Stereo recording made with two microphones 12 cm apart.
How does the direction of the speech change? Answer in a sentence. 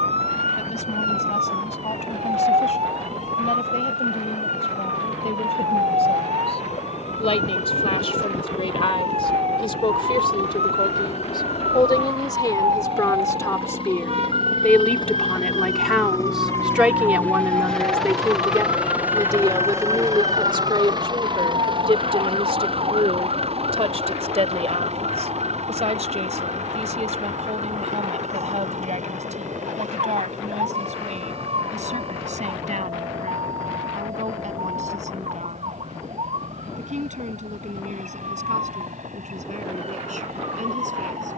In this clip you hear the speech travel towards the right.